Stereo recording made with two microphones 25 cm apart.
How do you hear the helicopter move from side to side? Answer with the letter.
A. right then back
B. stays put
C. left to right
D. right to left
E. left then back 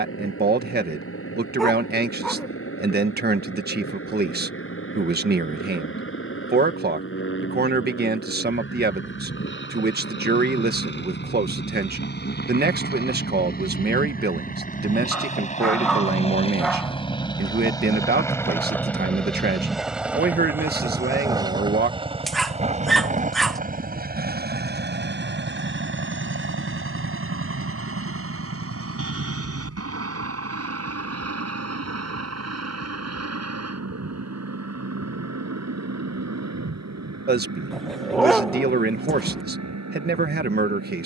C.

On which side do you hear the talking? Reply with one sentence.
In this clip you hear the talking on the right.